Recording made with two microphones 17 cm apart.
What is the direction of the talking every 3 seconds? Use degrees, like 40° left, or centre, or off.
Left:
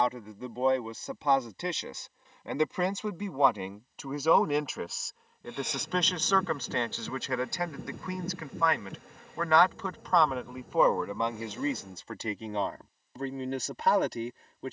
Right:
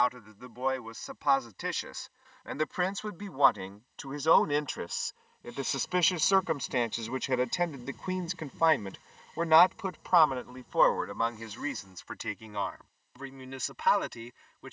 30° left, 10° left, 20° right, 10° left, 40° left.